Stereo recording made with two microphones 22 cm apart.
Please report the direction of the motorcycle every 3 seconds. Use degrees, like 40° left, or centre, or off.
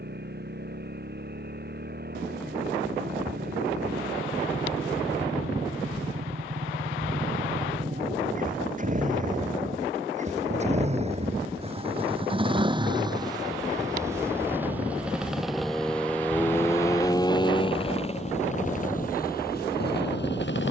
50° right, 40° right, 40° right, 30° right, 20° right, 10° left, 40° left.